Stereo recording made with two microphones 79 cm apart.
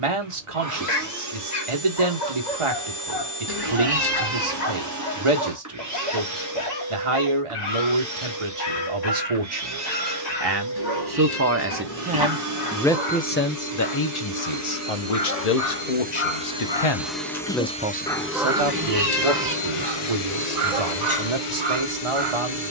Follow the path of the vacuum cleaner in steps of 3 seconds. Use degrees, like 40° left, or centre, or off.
20° right, 20° right, 20° right, 20° right, 20° right, 10° right, 40° left, 70° left.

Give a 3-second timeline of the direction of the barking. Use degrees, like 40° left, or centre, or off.
50° left, 50° left, 50° left, 50° left, 50° left, 30° left, 30° right, 60° right.